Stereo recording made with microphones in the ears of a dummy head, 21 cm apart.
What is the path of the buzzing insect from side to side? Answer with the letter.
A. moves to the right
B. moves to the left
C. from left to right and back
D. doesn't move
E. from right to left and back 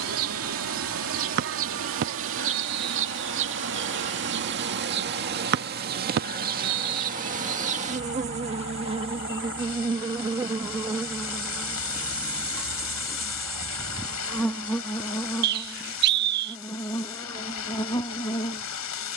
B.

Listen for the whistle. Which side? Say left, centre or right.
right.